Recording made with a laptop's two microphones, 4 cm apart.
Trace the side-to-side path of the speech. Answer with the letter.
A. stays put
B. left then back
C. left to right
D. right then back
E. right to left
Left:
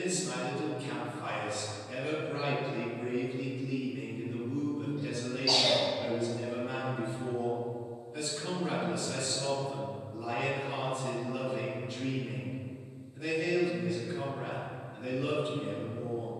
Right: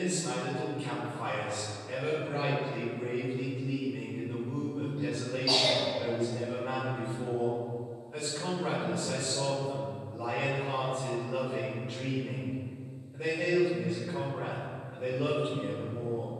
A.